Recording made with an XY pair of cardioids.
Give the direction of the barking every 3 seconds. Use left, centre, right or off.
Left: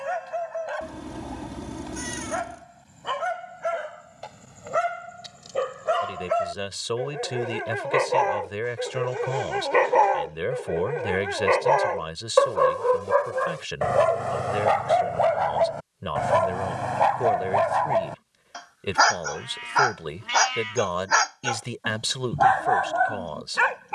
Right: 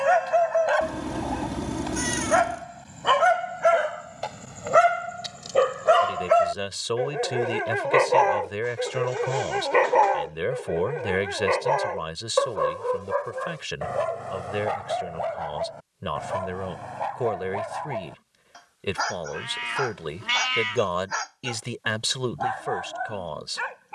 right, right, right, centre, left, left, left, left.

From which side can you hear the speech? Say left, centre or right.
centre.